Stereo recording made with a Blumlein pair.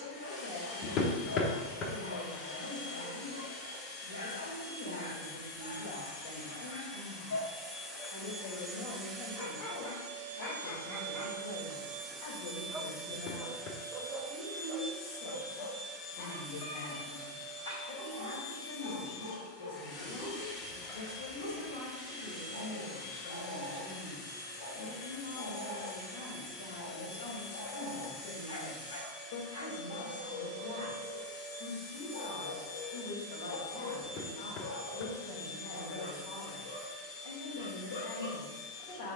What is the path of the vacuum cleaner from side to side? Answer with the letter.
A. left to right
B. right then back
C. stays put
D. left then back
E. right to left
B.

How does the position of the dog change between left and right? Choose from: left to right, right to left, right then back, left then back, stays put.
right then back.